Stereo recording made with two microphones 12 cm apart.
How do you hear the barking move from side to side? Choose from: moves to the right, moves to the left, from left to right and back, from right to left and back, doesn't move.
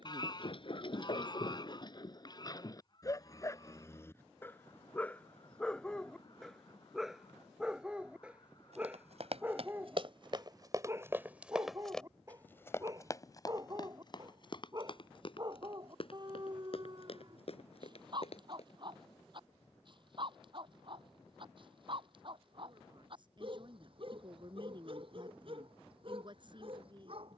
moves to the right.